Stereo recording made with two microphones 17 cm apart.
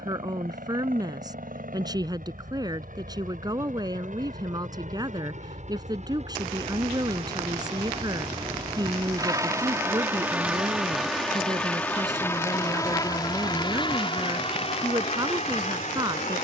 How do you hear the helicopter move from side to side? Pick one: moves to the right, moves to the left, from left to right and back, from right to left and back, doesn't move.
moves to the left.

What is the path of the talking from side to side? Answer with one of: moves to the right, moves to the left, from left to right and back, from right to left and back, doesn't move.
doesn't move.